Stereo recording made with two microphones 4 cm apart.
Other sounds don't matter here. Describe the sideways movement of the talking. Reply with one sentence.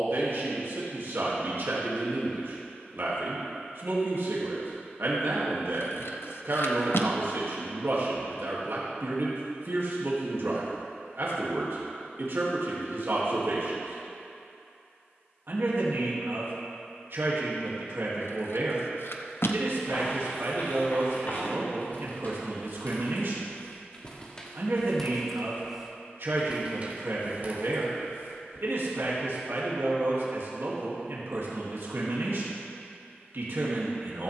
You can hear the talking stay in one place.